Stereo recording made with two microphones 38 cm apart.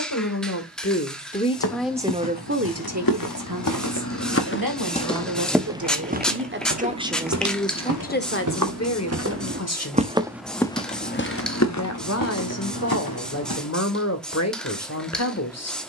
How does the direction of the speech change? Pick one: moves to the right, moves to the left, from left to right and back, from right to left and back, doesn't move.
from left to right and back.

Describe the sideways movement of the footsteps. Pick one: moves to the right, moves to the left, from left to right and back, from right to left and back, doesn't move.
from left to right and back.